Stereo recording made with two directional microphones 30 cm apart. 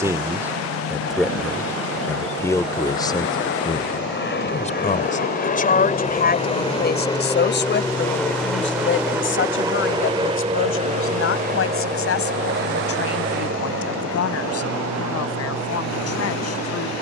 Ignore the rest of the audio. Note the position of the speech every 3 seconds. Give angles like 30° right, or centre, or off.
centre, 20° left, 40° left, 40° left, 50° left, 50° left.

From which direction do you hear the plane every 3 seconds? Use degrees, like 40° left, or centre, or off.
50° left, 40° left, 10° left, 20° right, 40° right, 50° right.